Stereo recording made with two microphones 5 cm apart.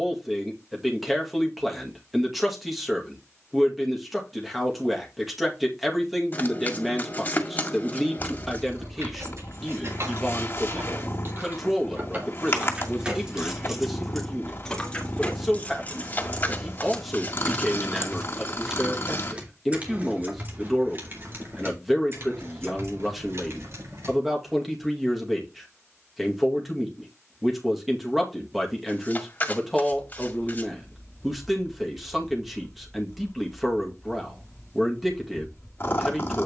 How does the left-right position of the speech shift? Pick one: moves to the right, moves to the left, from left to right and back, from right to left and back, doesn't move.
doesn't move.